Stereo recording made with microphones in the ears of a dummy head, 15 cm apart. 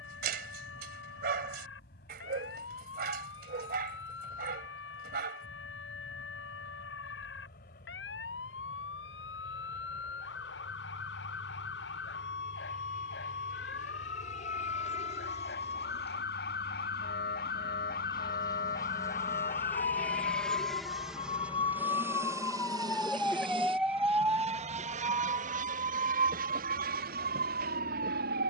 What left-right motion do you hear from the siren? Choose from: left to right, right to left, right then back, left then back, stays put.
left to right.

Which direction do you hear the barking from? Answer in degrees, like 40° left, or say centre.
60° right.